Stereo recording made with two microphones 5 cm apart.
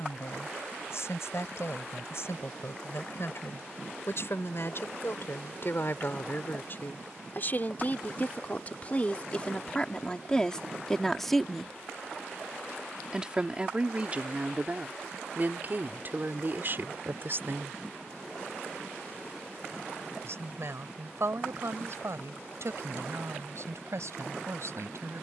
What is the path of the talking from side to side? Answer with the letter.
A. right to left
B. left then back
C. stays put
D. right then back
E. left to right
E.